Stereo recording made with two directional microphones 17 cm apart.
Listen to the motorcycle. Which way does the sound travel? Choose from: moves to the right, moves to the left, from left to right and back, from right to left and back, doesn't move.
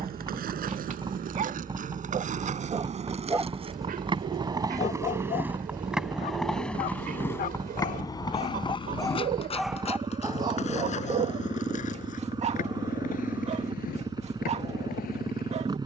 doesn't move.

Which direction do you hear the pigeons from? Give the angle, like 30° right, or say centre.
60° right.